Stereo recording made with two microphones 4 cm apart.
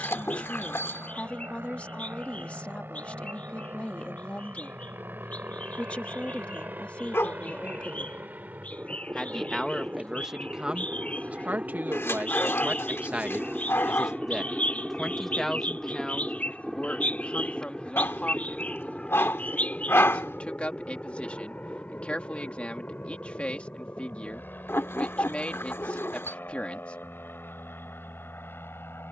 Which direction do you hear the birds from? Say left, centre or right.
left.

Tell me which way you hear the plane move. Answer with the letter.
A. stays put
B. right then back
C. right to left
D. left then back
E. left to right
C.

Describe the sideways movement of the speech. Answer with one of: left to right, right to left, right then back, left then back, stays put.
right then back.